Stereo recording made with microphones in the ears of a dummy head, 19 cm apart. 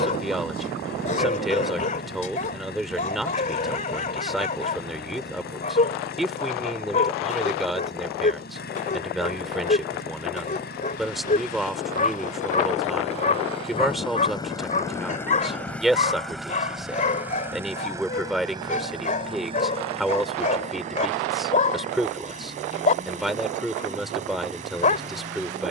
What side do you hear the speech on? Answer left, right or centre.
centre.